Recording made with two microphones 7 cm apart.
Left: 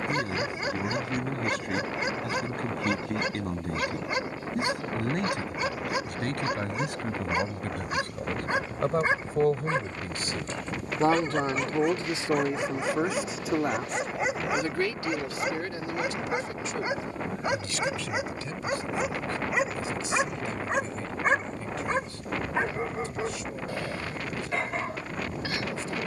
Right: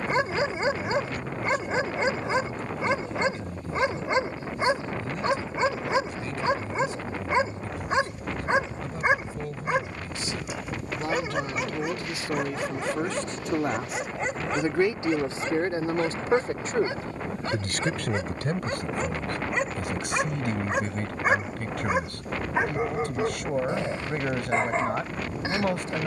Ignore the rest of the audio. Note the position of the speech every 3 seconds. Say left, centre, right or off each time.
left, left, left, left, centre, right, right, right, right.